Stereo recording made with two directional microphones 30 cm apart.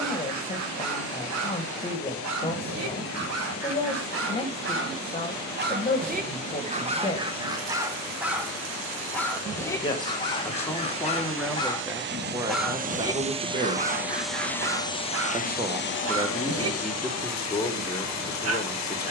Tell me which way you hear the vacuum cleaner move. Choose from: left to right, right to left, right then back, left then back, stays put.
right to left.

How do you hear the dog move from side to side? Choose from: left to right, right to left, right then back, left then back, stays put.
left then back.